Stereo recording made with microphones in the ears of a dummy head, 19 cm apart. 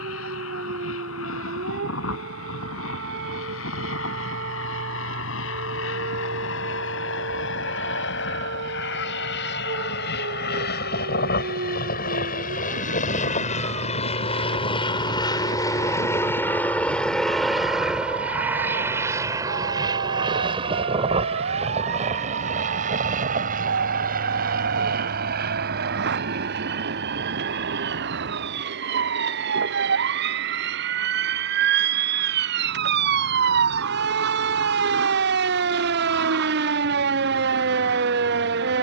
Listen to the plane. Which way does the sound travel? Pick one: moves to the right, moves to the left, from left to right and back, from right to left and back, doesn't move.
moves to the right.